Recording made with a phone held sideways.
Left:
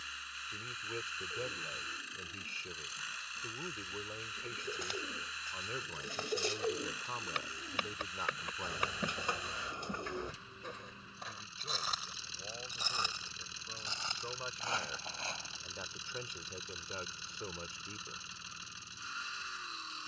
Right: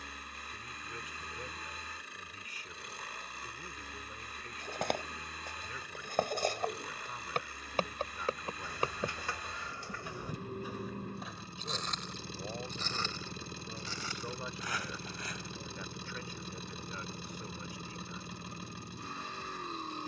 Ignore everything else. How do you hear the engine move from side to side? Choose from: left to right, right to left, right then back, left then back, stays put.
stays put.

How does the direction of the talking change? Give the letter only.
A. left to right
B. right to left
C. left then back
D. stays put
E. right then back
E.